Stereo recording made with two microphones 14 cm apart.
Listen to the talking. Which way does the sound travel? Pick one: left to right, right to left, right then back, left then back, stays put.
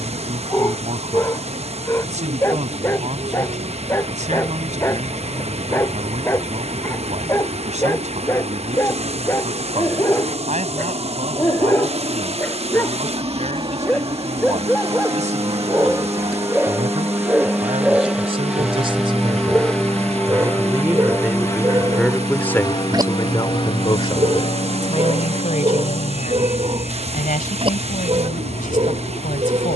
right to left.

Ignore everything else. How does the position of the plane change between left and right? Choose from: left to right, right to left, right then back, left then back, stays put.
right to left.